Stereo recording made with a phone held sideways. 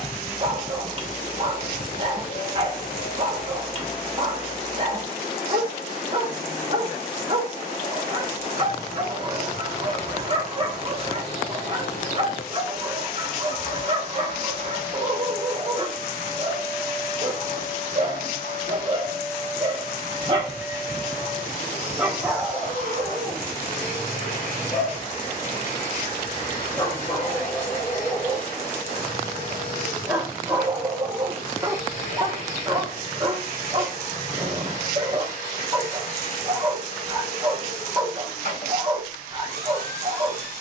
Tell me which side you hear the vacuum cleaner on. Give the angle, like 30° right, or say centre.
60° left.